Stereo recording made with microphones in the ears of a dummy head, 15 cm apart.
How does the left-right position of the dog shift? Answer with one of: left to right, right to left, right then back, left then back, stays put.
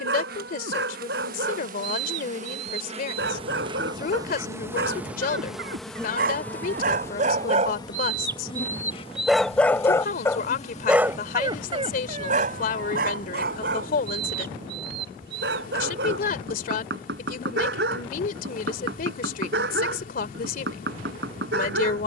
left then back.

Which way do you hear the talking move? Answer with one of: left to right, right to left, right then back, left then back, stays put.
stays put.